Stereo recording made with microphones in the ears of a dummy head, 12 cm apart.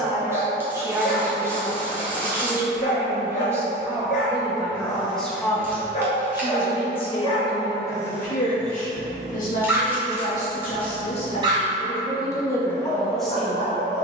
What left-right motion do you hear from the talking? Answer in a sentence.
In this clip you hear the talking go left and come back.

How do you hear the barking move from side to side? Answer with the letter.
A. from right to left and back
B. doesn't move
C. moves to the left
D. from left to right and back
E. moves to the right
D.